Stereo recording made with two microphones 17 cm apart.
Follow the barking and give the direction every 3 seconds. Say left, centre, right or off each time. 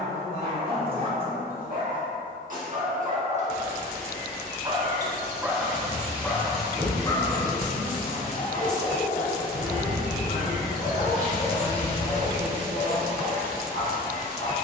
right, right, left, left, left.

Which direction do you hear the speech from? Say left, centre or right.
left.